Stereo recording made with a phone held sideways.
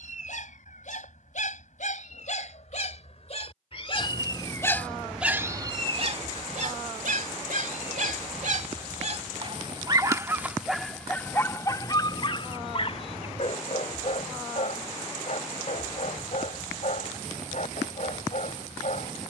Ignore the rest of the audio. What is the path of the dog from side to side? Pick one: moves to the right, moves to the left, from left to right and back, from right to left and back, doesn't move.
from left to right and back.